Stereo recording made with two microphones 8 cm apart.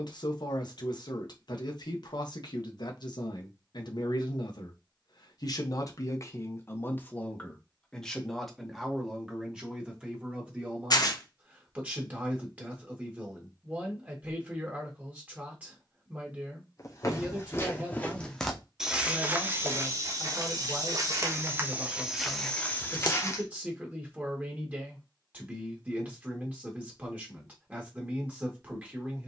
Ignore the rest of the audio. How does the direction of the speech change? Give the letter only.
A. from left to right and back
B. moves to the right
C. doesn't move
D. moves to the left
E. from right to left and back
B.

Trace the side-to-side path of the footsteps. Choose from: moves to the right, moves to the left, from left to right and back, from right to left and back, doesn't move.
from left to right and back.